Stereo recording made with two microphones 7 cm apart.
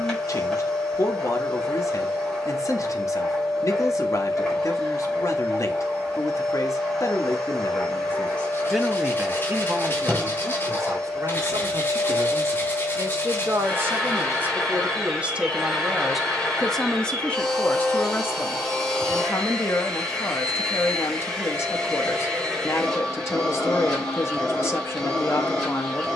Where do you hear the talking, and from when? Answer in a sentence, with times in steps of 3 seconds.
You can hear the talking on the left from 0 s, on the right from 9 s, in the centre from 15 s and on the left from 18 s.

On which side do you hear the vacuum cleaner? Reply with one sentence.
You can hear the vacuum cleaner in the centre.